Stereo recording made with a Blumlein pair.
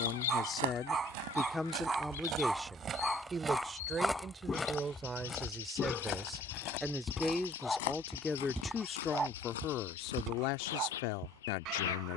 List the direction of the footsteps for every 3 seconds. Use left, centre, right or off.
right, centre, left, left.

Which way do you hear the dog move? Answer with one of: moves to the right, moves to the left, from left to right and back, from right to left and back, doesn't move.
from right to left and back.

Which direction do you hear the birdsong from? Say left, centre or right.
left.